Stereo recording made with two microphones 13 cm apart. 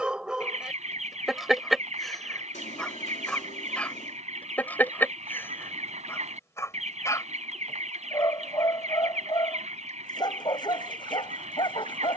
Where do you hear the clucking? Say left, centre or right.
right.